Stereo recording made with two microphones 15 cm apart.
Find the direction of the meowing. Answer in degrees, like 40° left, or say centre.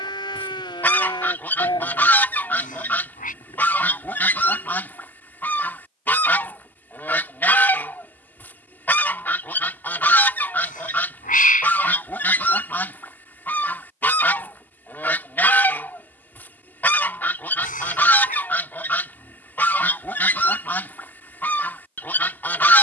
70° left.